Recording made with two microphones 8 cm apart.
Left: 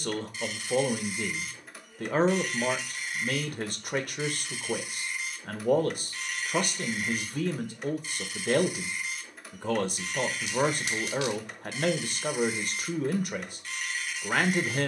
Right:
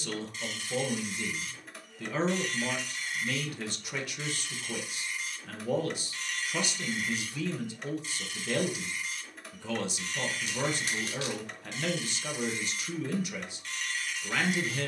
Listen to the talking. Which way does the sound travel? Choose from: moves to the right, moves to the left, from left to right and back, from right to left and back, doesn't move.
doesn't move.